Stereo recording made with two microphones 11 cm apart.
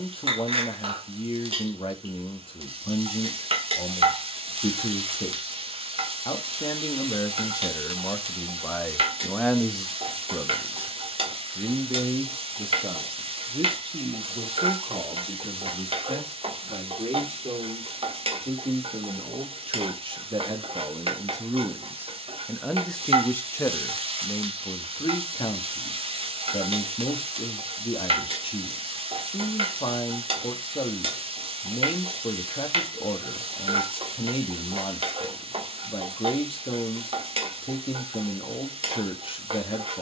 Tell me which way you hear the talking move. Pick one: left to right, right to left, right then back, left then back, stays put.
right then back.